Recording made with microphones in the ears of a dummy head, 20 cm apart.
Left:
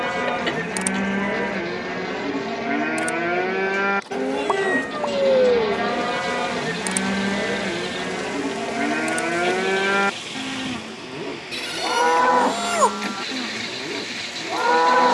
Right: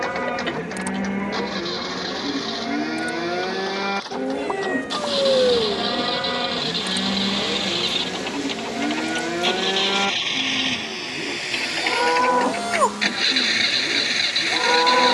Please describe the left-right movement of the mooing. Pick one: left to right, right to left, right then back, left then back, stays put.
stays put.